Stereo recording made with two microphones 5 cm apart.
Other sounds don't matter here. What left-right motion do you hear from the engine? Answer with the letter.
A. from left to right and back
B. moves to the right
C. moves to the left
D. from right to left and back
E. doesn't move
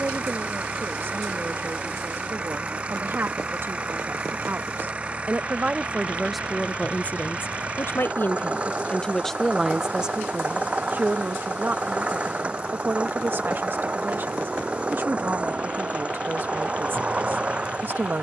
E.